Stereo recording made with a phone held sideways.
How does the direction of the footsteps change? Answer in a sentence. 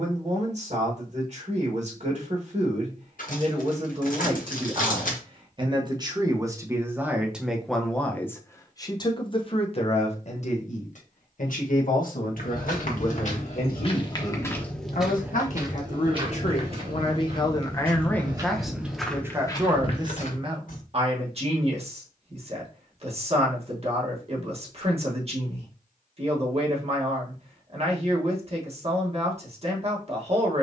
In this clip you hear the footsteps move from left to right and back again.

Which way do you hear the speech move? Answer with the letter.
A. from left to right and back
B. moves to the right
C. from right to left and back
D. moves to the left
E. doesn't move
C.